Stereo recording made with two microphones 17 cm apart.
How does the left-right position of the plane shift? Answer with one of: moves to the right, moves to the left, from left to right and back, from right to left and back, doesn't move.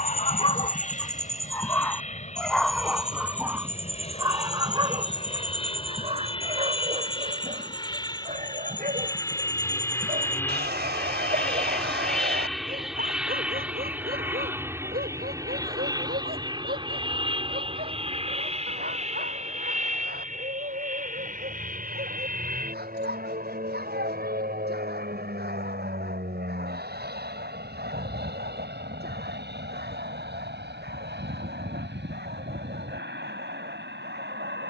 moves to the right.